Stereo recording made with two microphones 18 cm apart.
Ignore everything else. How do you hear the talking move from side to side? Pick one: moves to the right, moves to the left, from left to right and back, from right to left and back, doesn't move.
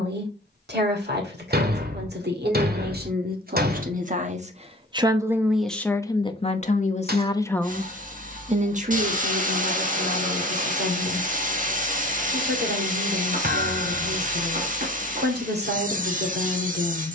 from right to left and back.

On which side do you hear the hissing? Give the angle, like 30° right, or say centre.
50° right.